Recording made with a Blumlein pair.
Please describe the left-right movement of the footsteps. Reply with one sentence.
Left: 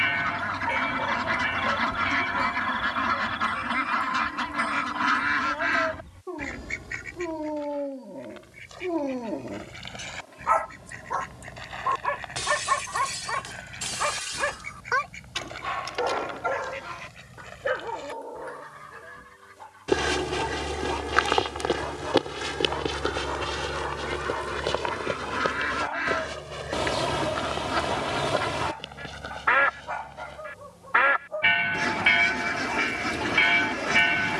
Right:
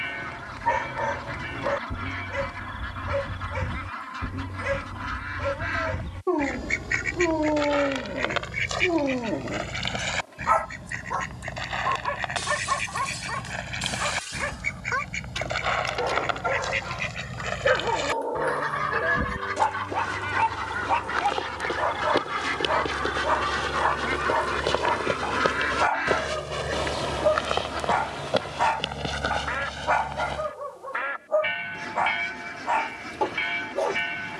In this clip you hear the footsteps travel towards the right.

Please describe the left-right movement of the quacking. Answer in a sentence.
You can hear the quacking move from left to right and back again.